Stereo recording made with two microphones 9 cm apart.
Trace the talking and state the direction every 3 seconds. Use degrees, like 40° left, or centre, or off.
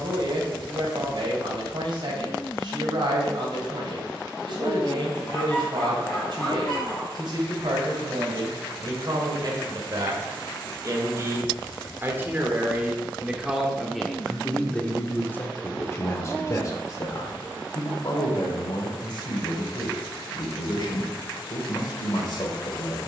60° right, 60° right, 60° right, 40° right, 10° right, 30° left, 60° left, 60° left.